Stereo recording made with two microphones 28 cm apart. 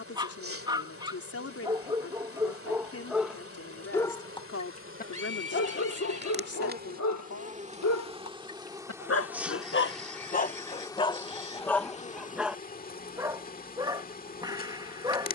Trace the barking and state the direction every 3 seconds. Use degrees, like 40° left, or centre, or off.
10° right, 20° left, 70° left, 30° left, 10° right.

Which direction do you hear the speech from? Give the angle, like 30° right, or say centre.
60° left.